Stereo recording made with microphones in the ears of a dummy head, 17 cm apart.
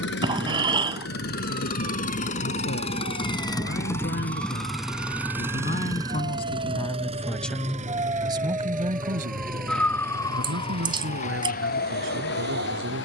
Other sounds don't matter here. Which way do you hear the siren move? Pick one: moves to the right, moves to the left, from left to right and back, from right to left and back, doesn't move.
moves to the left.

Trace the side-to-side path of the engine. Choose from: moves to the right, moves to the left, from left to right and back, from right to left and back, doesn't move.
moves to the right.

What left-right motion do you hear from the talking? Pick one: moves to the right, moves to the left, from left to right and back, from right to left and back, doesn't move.
moves to the right.